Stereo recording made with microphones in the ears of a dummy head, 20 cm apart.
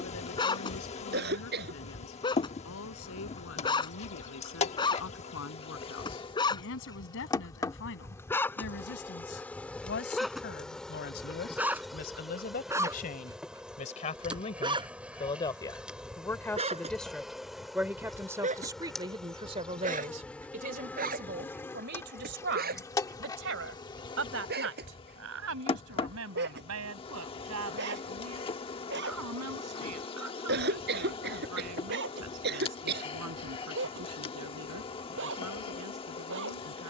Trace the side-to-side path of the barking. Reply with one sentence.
In this clip you hear the barking move from left to right.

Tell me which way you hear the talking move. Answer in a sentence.
In this clip you hear the talking move from left to right.